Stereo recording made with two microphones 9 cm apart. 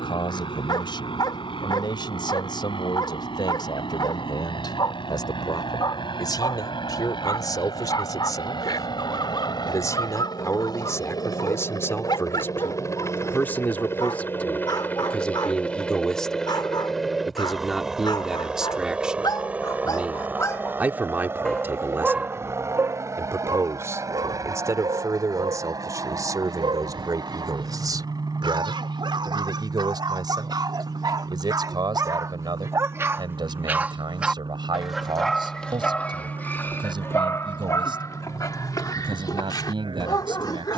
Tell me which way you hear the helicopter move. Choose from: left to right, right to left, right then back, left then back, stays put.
left to right.